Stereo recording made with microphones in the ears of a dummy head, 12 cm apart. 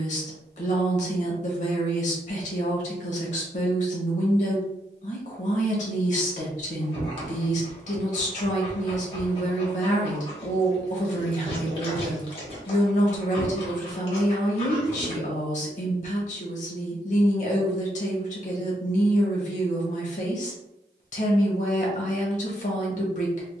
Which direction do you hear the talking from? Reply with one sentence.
In this clip you hear the talking on the left.